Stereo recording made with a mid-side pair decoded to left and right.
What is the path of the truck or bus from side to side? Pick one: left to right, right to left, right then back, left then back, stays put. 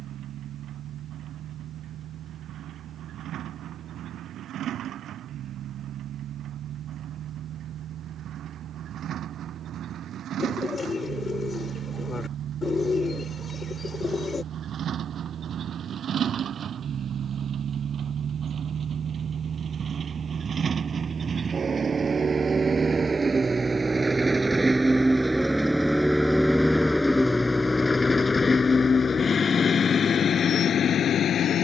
right to left.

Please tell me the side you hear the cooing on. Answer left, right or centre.
left.